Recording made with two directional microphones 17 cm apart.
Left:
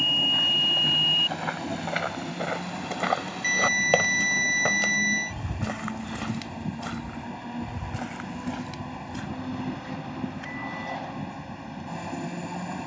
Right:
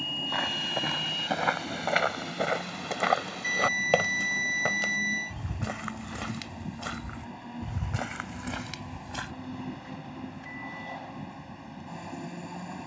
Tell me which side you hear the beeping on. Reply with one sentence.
In this clip you hear the beeping on the left.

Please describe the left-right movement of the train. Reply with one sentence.
In this clip you hear the train stay in one place.